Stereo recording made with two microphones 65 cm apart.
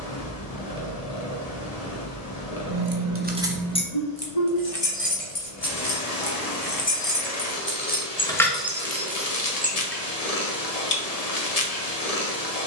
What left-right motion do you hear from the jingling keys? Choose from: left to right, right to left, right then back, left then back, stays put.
left then back.